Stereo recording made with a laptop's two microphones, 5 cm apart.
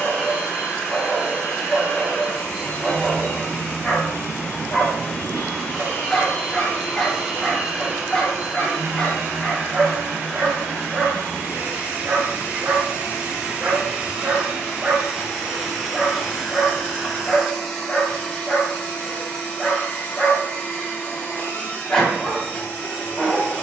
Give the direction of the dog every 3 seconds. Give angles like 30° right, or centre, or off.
20° left, 20° left, 20° left, centre, 40° right, 10° left, 20° left, 20° left.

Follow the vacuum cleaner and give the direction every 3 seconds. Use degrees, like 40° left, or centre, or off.
40° left, 40° left, centre, 40° right, 20° right, centre, 30° left, 30° left.